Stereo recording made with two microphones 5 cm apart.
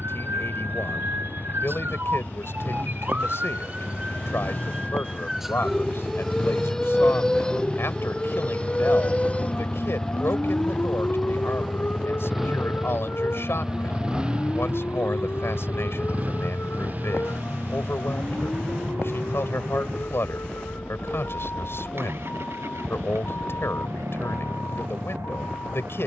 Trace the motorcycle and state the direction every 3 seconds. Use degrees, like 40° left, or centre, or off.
50° left, 40° left, 30° left, 10° left, 10° right, 40° right, 50° right, 60° right, 70° right.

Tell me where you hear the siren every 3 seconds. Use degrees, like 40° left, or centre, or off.
60° right, 20° right, 10° left, 30° left, 40° left, 50° left, 50° left, 50° left, 50° left.